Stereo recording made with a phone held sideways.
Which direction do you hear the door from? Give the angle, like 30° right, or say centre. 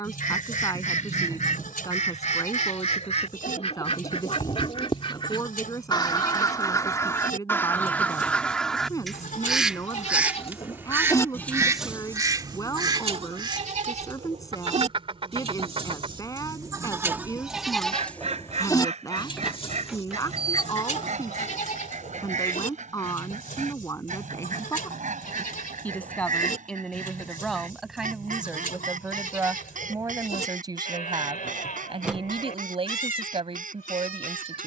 10° right.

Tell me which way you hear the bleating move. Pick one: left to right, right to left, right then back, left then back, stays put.
right then back.